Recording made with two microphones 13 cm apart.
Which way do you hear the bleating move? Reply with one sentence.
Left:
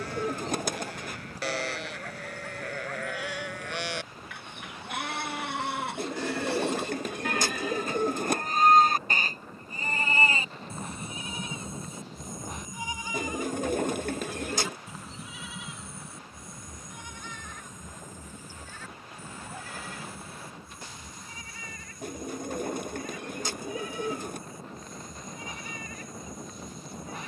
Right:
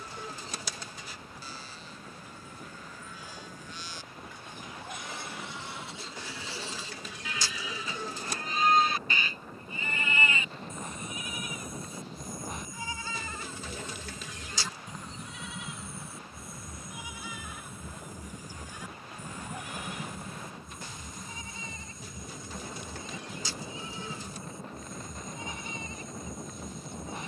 You can hear the bleating travel towards the right.